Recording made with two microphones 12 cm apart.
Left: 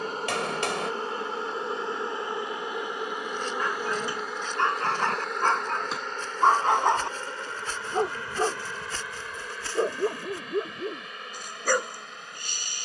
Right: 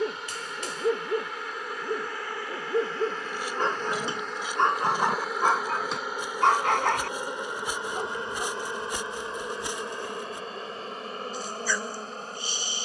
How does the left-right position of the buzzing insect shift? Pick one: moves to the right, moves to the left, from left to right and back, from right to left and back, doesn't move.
moves to the right.